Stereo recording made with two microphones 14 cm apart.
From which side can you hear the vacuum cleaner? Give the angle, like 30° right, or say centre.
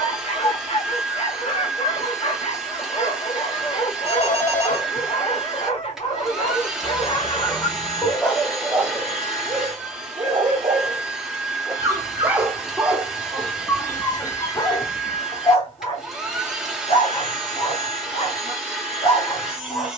centre.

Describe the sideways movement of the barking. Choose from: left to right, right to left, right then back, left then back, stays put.
right then back.